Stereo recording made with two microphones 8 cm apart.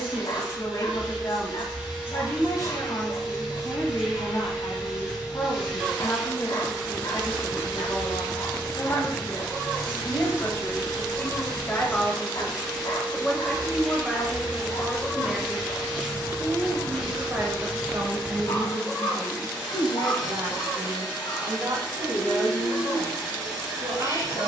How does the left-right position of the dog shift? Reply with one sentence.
In this clip you hear the dog stay put.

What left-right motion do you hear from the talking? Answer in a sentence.
In this clip you hear the talking go from the left side to the right.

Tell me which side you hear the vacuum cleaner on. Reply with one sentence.
In this clip you hear the vacuum cleaner in the centre.